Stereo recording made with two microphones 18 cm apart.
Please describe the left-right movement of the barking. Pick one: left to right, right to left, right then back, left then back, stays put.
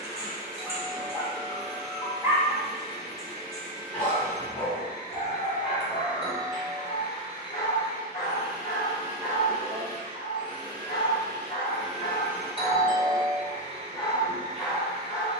left then back.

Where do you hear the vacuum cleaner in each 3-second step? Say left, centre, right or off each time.
left, left, left, left, right.